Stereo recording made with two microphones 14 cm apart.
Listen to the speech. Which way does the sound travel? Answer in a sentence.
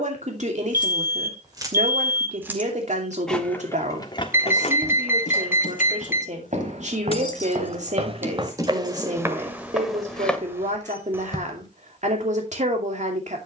You can hear the speech stay in one place.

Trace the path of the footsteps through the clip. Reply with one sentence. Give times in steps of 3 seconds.
In this clip you hear the footsteps not at all from 0 s, on the right from 3 s, in the centre from 9 s and not at all from 12 s.